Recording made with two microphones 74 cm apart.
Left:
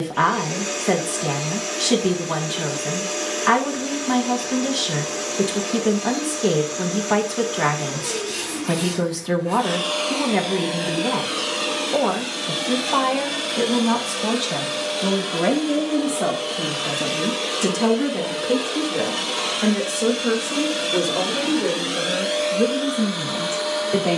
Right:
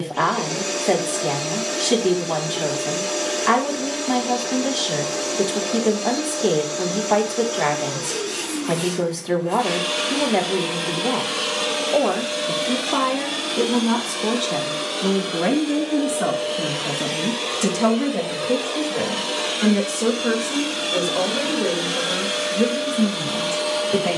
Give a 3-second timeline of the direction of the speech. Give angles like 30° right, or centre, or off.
40° left, 40° left, 40° left, 40° left, 20° left, centre, 20° right, 30° right.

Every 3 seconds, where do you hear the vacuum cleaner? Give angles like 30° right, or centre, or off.
60° right, 60° right, 60° right, 40° right, 10° left, 40° left, 30° left, 40° right.